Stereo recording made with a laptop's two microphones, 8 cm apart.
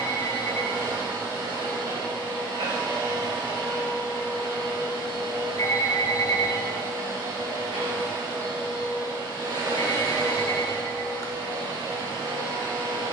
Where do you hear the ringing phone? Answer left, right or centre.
left.